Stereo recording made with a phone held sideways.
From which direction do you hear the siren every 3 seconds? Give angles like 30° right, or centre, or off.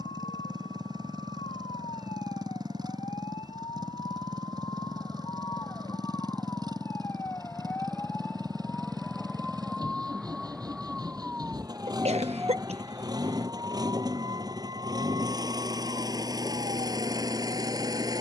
40° left, 30° left, 20° left, centre, 30° right, 40° right.